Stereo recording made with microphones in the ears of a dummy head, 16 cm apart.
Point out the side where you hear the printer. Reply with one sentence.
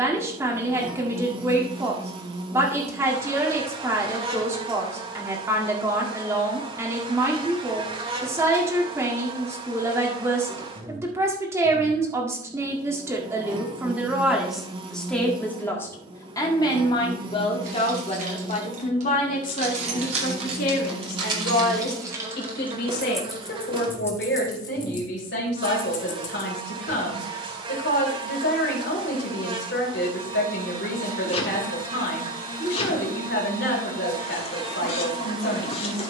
You can hear the printer on the left.